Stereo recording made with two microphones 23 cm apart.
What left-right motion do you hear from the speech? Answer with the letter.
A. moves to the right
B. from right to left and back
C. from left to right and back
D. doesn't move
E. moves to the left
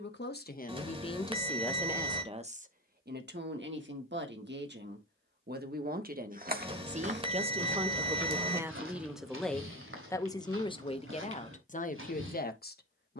C.